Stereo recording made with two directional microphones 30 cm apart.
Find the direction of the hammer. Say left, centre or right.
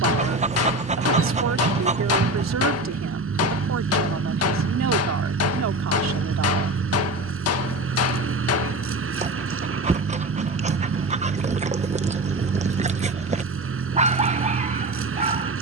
left.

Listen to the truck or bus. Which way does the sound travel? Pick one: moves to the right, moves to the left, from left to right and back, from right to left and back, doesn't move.
doesn't move.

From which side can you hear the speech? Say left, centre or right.
right.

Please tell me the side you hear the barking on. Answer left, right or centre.
right.